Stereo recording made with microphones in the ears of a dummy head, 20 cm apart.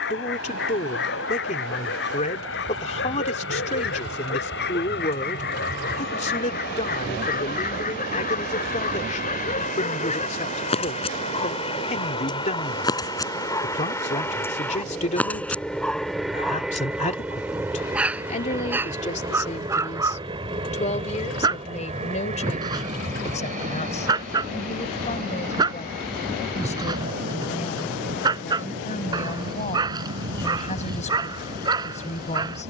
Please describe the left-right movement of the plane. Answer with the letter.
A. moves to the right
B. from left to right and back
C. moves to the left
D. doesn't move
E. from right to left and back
A.